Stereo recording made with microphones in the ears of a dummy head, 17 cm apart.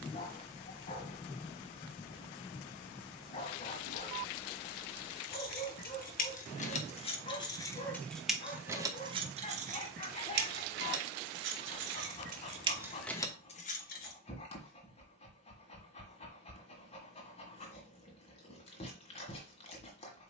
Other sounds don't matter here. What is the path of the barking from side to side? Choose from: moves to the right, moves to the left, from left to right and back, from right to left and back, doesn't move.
doesn't move.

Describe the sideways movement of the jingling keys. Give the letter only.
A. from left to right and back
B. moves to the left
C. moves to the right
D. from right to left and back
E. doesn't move
A.